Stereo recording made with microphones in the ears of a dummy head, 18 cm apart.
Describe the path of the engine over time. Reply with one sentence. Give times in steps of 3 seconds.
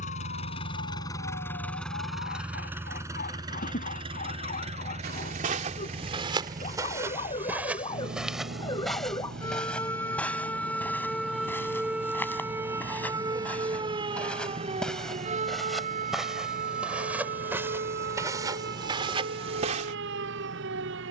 In this clip you hear the engine in the centre from 0 s and on the right from 3 s.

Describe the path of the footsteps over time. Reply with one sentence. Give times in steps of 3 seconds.
In this clip you hear the footsteps not at all from 0 s, on the right from 3 s, in the centre from 6 s and on the right from 18 s.